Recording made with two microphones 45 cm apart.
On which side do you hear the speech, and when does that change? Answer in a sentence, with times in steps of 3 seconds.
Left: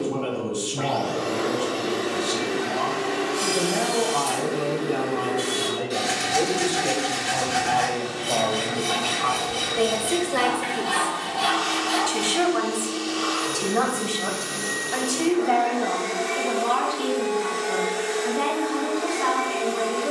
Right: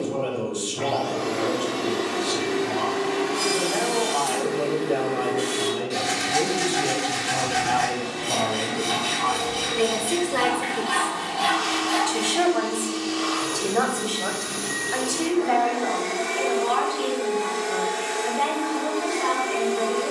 You can hear the speech on the left from 0 s, on the right from 6 s, in the centre from 9 s and on the left from 12 s.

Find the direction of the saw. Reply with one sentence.
You can hear the saw on the left.